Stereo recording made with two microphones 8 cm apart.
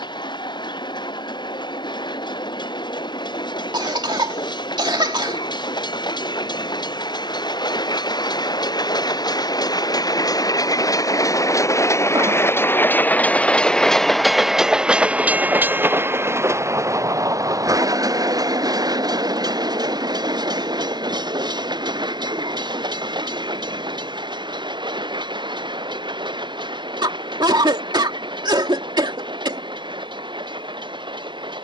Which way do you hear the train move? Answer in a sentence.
In this clip you hear the train move from left to right.